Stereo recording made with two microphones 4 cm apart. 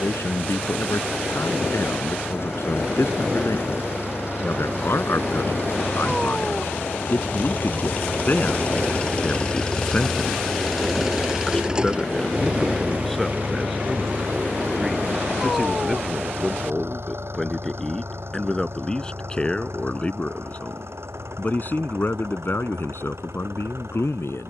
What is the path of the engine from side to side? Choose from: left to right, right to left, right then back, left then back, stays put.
left to right.